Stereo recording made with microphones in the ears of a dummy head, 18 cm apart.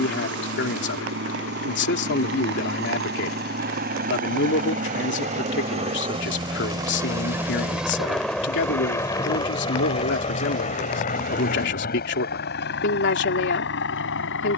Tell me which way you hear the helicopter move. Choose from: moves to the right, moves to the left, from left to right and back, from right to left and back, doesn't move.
moves to the left.